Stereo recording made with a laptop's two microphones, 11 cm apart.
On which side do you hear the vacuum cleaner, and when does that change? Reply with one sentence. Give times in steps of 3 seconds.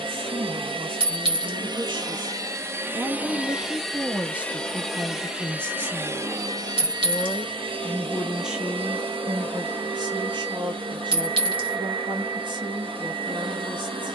In this clip you hear the vacuum cleaner on the right from 0 s, in the centre from 3 s and on the right from 6 s.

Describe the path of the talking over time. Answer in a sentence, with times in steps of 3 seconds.
You can hear the talking on the right from 0 s, in the centre from 3 s and on the right from 9 s.